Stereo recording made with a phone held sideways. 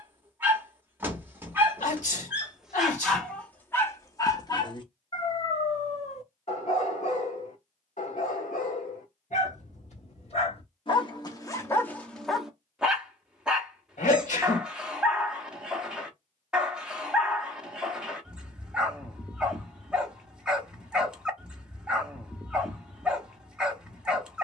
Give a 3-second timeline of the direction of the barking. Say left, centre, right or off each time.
centre, left, left, left, centre, centre, centre, centre.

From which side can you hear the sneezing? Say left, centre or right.
left.